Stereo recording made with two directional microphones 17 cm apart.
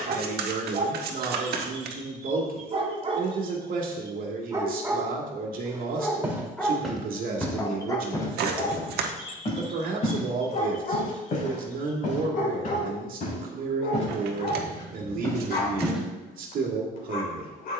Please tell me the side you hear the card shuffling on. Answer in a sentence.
You can hear the card shuffling on the right.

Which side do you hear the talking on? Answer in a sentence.
In this clip you hear the talking on the right.